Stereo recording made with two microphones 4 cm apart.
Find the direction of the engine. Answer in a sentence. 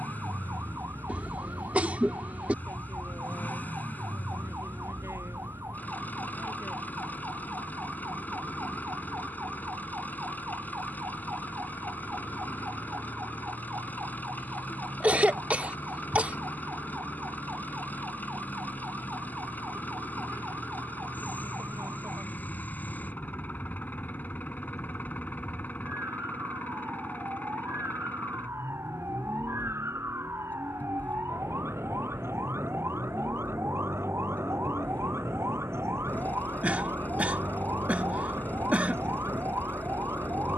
In this clip you hear the engine on the left.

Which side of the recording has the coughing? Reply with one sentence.
In this clip you hear the coughing on the right.